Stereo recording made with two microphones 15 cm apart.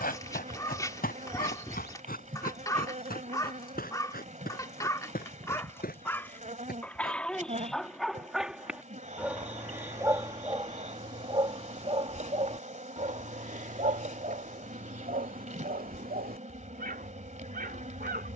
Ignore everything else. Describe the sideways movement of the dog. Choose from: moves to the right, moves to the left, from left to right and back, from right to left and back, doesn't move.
moves to the right.